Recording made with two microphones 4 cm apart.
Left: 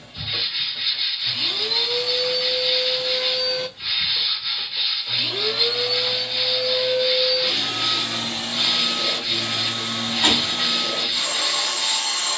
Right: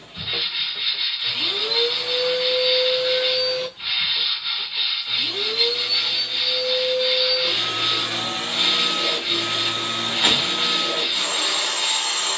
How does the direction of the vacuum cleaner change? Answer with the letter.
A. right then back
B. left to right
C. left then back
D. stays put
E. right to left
C.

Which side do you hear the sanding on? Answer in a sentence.
In this clip you hear the sanding on the right.